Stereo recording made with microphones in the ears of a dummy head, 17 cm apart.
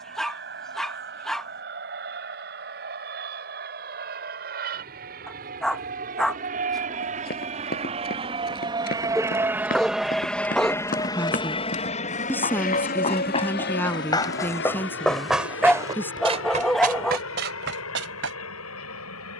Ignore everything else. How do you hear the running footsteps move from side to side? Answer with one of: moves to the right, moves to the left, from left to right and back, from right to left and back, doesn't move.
moves to the right.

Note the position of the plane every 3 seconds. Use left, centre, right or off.
right, right, right, centre, left, left, left.